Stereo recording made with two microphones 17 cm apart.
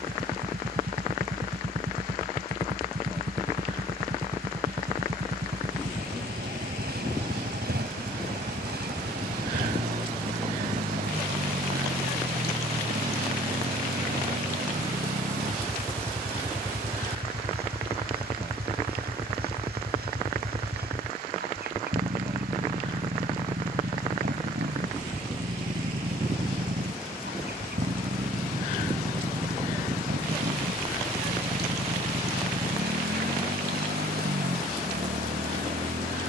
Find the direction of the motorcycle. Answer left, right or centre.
right.